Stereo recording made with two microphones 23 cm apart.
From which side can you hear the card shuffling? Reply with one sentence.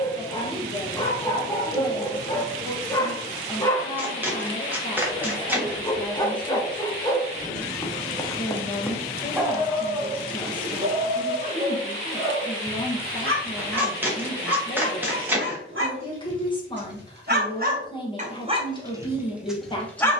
In this clip you hear the card shuffling in the centre.